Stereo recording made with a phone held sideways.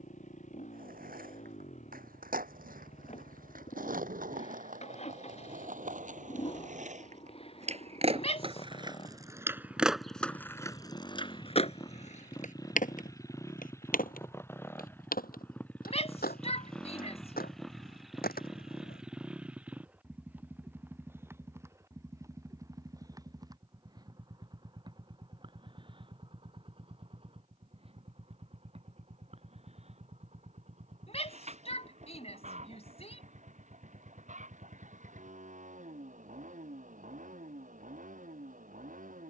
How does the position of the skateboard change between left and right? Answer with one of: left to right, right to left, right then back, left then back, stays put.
right to left.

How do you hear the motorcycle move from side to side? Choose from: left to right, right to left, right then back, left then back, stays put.
left to right.